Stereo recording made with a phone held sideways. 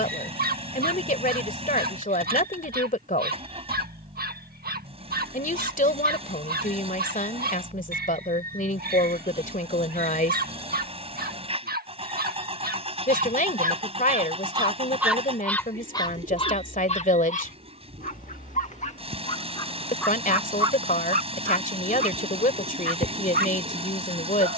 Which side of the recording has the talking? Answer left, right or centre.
left.